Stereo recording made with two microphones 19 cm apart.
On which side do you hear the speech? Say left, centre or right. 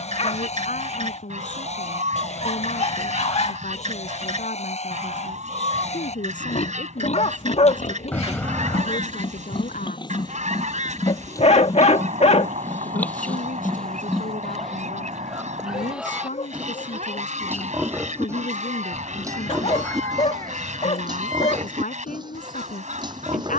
left.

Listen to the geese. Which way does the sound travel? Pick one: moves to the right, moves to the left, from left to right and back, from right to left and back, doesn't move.
doesn't move.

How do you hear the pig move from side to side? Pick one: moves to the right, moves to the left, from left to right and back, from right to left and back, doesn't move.
moves to the right.